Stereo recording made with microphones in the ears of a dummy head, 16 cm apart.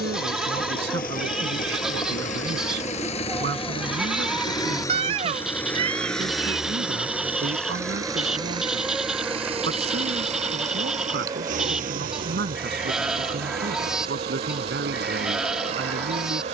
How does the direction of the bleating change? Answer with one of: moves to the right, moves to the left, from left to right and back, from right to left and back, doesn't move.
doesn't move.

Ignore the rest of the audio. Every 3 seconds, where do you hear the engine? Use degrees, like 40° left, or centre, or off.
50° left, 20° left, 10° right, 40° right, 60° right, 60° right.